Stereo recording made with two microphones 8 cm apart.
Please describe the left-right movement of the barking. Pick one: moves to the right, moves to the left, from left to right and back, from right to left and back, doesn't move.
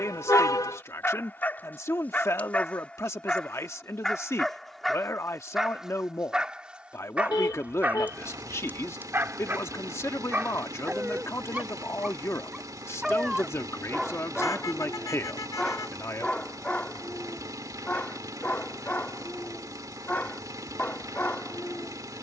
from left to right and back.